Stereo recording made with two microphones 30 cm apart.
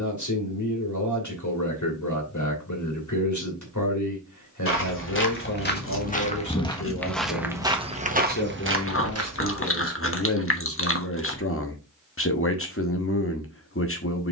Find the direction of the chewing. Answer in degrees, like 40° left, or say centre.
40° left.